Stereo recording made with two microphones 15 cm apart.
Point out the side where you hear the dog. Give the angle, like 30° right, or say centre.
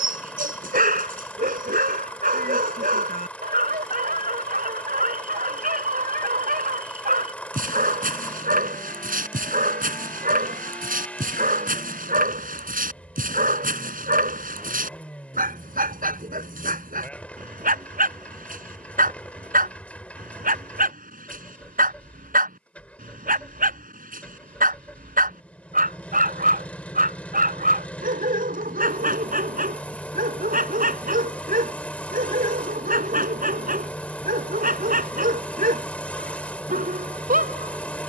70° right.